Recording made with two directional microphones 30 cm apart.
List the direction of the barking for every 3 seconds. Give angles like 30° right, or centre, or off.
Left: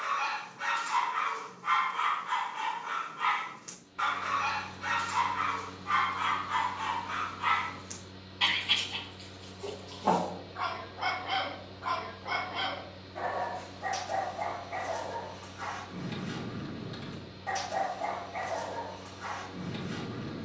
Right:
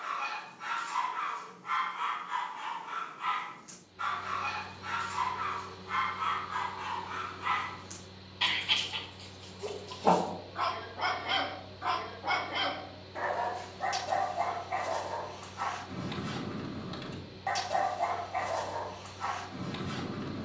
60° left, 60° left, 30° left, 20° right, 50° right, 50° right, 50° right.